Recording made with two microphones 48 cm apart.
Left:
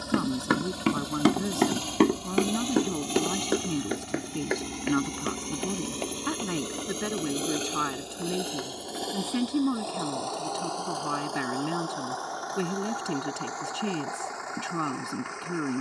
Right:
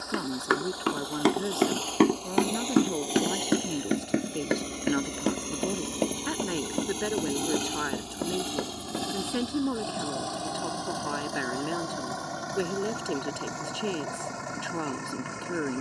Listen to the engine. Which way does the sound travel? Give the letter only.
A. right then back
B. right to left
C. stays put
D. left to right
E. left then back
D.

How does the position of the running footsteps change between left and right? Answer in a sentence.
You can hear the running footsteps go from the left side to the right.